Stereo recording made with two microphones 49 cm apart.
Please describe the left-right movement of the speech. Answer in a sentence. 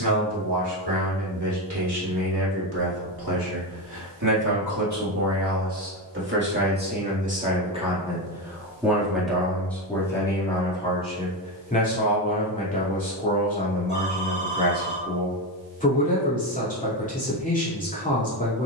In this clip you hear the speech go from the right side to the left.